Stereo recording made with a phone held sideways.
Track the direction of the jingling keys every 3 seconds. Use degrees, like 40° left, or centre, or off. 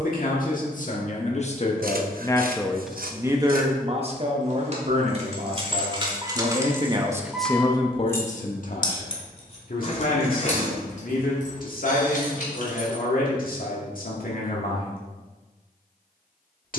off, 40° right, 10° right, 50° left, 70° left, off.